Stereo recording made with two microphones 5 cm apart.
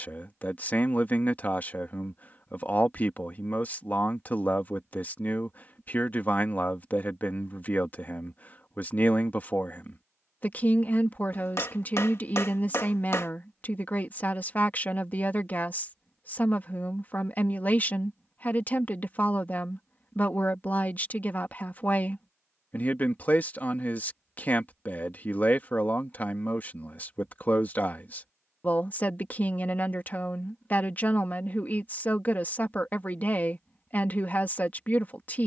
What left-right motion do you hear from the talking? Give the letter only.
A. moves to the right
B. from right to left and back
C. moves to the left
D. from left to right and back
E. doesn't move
E.